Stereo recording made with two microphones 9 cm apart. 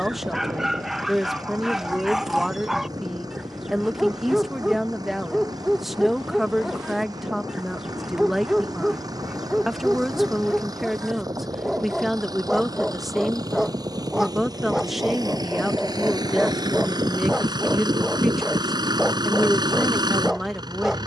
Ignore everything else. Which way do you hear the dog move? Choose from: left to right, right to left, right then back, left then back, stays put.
stays put.